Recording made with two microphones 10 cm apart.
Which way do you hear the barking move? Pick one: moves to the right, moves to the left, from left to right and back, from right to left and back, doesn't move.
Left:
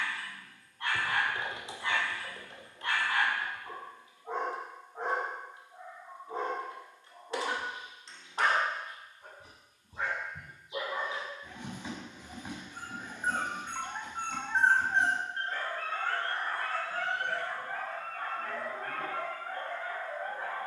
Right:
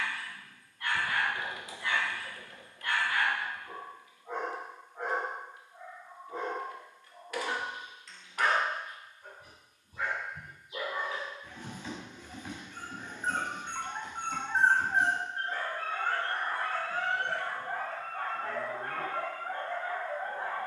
moves to the right.